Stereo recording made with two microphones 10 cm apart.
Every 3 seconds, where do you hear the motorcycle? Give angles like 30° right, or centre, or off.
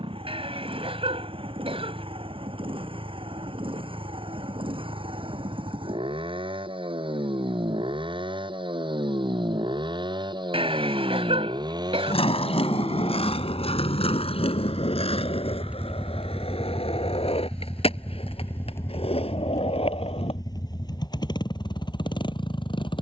70° right, 70° right, 60° right, 50° right, 40° right, centre, 30° left, 50° left.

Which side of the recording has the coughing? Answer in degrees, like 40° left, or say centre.
80° right.